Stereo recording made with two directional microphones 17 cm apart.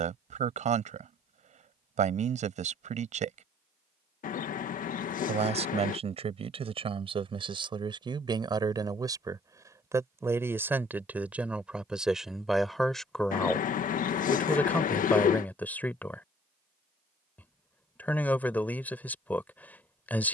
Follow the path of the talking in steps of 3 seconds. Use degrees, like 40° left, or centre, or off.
40° right, 40° right, 30° right, 10° right, centre, 10° left, 10° left.